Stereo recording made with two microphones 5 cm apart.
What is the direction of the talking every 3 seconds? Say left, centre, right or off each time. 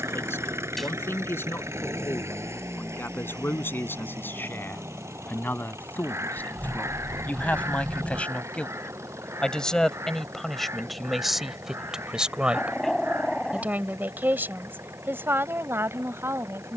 left, left, left, centre, right, right.